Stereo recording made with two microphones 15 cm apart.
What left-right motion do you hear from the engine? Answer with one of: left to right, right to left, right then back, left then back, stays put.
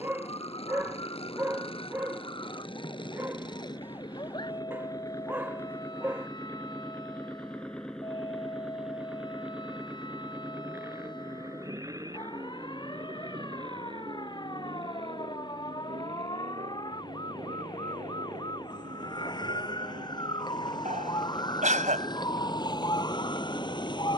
left to right.